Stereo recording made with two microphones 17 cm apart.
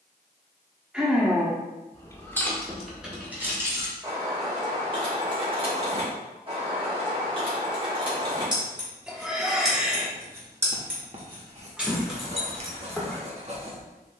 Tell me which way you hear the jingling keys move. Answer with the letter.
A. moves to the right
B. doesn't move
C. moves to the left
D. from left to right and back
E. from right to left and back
D.